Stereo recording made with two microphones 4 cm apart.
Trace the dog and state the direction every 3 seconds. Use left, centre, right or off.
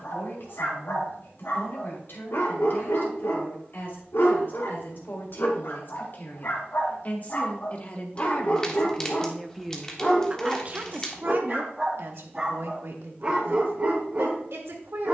left, left, left, centre, right.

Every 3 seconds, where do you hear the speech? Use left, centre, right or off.
left, left, left, right, right.